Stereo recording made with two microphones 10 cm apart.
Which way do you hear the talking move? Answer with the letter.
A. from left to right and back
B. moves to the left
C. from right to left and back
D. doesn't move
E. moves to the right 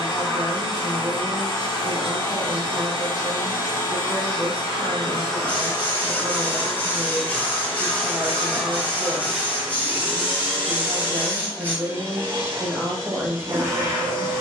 D.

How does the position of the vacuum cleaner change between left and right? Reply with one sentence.
You can hear the vacuum cleaner travel towards the right.